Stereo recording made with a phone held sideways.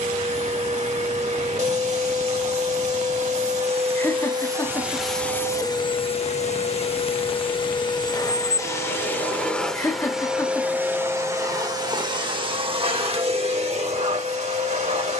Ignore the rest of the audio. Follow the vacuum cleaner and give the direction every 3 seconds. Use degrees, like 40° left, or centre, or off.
50° right, 20° right, 30° left, 10° right, 40° right.